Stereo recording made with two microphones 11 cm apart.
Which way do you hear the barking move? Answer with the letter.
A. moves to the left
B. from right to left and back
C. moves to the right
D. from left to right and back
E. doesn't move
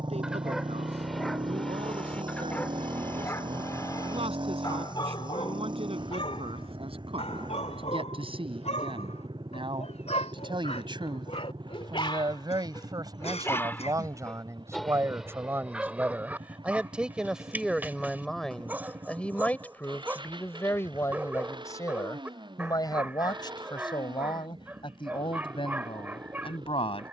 B.